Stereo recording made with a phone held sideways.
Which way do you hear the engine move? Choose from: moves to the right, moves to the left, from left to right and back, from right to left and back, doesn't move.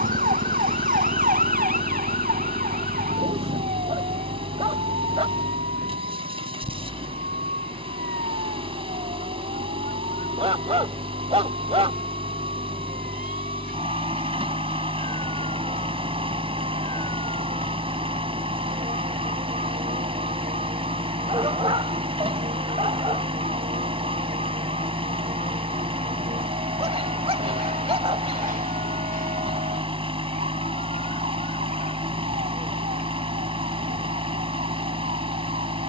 doesn't move.